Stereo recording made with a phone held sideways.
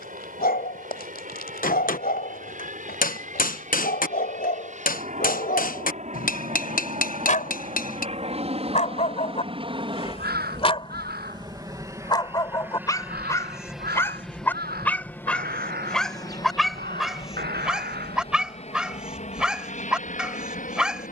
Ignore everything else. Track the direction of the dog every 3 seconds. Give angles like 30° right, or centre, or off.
70° left, 70° left, 50° left, 40° left, 20° left, centre, 10° right.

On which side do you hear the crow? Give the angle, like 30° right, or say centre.
90° right.